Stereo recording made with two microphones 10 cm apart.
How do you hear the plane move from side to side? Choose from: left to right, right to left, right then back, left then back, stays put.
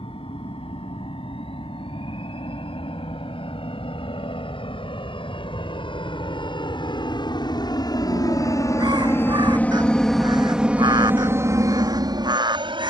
left to right.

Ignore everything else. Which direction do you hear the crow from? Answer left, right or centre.
right.